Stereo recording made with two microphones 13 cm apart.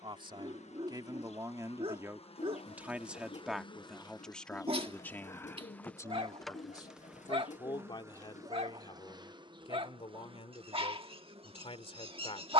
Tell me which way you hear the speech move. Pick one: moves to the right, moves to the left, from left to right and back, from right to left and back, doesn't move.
moves to the left.